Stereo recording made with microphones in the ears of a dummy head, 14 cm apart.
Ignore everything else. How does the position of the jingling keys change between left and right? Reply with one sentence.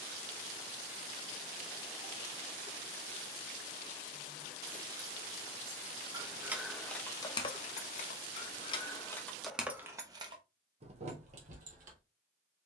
You can hear the jingling keys move from right to left and back again.